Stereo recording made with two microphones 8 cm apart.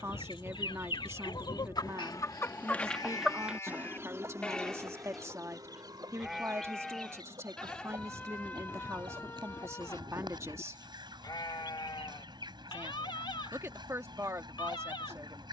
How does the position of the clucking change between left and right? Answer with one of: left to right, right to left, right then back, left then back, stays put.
left to right.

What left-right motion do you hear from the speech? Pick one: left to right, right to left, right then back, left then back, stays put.
stays put.